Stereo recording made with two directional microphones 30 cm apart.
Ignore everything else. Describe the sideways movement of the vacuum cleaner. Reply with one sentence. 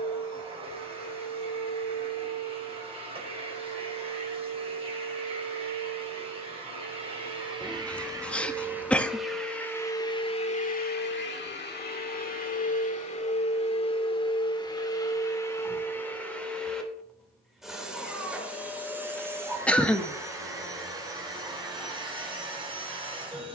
You can hear the vacuum cleaner move from right to left and back again.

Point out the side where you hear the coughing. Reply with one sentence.
You can hear the coughing in the centre.